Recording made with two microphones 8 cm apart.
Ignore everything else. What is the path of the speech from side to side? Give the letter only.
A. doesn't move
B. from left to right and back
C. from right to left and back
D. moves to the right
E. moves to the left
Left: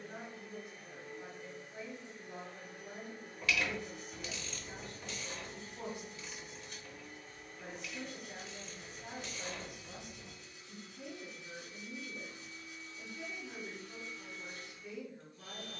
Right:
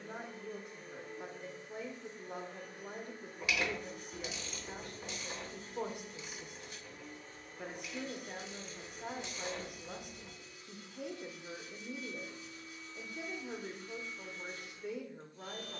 A.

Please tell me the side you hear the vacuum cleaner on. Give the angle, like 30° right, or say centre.
30° right.